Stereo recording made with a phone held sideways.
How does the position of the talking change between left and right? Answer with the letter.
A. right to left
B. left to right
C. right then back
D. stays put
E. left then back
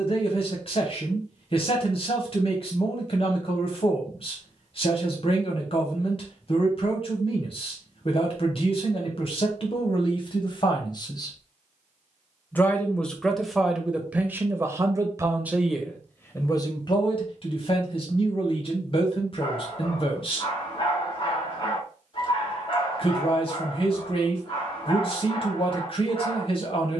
C.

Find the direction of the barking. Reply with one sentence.
In this clip you hear the barking on the left.